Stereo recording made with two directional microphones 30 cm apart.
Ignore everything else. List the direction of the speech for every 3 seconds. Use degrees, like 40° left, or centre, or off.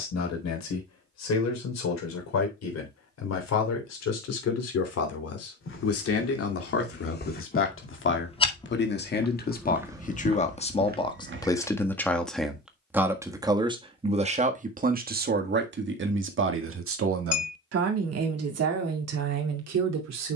60° left, 60° left, 40° left, 20° left, 10° right, 40° right, 60° right.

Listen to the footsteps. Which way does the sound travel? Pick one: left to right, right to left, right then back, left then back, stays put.
left to right.